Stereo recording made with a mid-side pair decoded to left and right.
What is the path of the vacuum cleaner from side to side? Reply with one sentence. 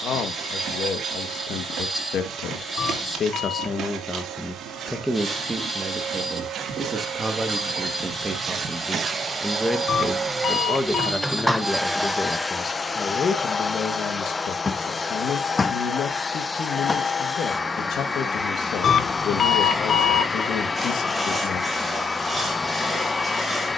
You can hear the vacuum cleaner move to the left.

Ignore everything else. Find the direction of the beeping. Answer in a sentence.
In this clip you hear the beeping on the left.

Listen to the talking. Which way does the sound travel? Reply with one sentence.
You can hear the talking move from left to right and back again.